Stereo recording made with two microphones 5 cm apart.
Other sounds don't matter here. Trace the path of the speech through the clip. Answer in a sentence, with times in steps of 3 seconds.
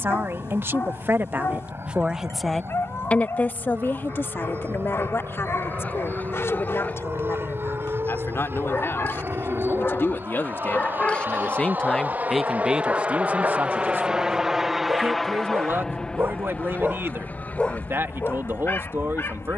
You can hear the speech on the right from 0 s, on the left from 3 s and on the right from 12 s.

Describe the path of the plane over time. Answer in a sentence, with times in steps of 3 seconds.
In this clip you hear the plane on the right from 0 s and on the left from 15 s.